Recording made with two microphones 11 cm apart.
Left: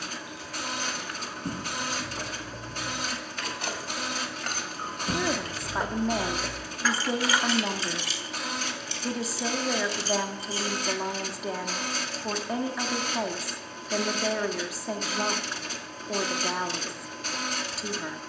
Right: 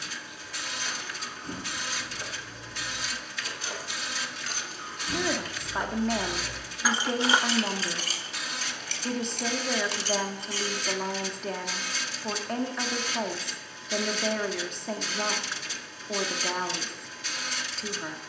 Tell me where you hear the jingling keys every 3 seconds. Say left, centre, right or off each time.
left, left, right, right, off, off.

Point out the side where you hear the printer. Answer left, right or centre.
left.